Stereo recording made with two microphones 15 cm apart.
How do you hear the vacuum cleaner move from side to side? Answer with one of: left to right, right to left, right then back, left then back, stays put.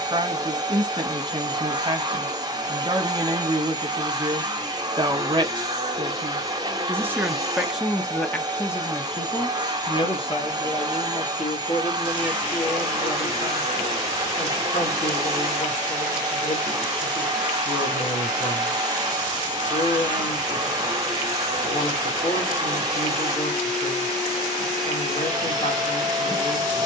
stays put.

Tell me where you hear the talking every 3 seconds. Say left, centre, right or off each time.
right, right, centre, left, left, left, left, left, left.